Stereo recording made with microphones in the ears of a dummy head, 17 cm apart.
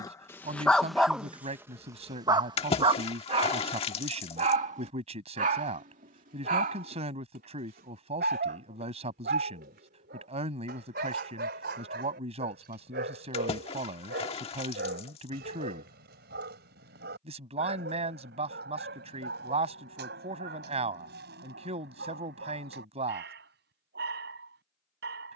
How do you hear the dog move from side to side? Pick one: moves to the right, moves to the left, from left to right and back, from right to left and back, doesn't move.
moves to the right.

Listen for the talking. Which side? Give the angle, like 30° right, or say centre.
40° right.